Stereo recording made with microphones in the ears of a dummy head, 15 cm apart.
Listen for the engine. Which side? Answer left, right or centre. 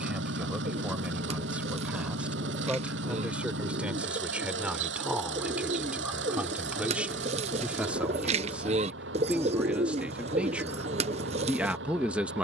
right.